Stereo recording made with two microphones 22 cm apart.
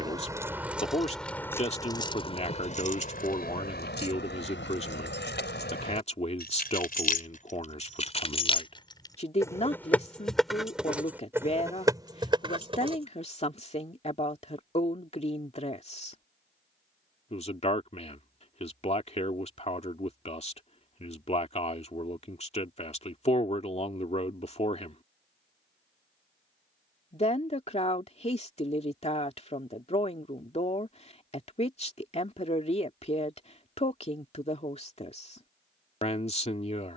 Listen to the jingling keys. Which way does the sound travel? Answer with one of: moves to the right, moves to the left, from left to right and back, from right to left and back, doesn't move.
from right to left and back.